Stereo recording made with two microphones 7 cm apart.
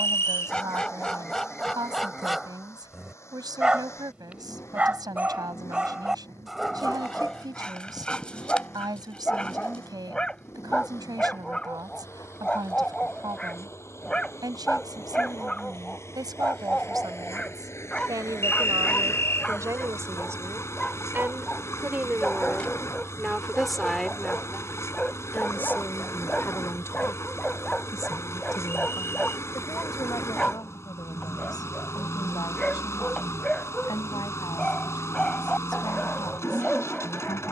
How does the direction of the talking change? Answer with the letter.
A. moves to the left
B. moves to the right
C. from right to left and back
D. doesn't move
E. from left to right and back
A.